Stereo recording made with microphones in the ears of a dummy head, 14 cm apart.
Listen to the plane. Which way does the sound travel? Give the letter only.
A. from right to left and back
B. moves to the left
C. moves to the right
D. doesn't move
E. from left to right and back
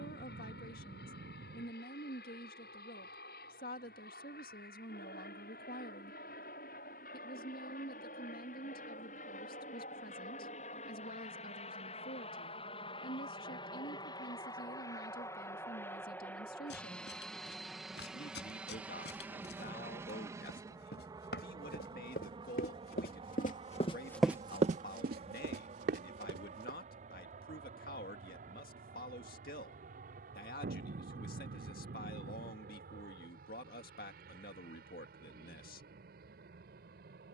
C.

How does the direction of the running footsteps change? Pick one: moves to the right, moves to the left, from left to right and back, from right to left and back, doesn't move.
moves to the right.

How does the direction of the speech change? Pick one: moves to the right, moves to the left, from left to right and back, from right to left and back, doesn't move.
doesn't move.